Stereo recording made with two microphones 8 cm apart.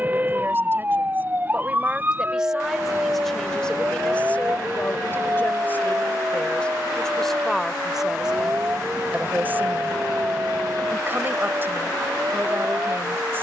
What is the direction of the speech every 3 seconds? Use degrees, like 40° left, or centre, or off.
20° right, 20° left, 10° left, 30° right, 30° right.